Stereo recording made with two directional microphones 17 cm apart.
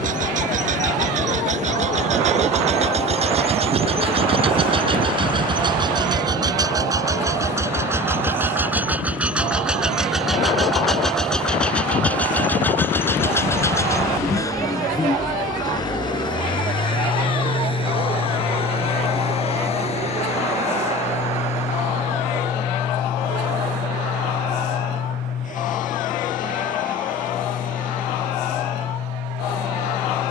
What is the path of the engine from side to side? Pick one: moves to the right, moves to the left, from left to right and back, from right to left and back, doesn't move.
moves to the left.